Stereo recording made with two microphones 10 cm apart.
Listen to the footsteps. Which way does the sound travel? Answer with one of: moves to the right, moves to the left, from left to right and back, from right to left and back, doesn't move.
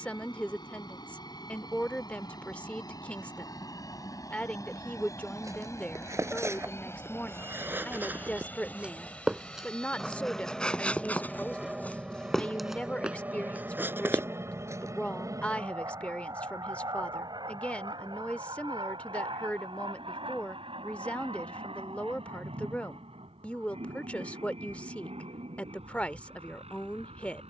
from right to left and back.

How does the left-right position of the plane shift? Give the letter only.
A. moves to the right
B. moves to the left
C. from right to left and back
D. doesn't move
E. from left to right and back
A.